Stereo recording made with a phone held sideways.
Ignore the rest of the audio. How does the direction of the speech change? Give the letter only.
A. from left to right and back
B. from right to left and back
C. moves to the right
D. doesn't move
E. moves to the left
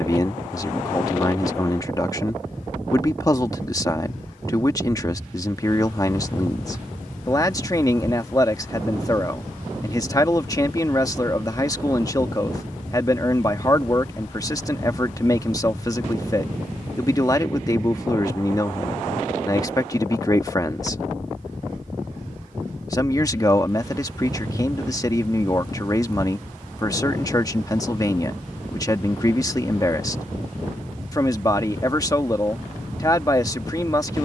D.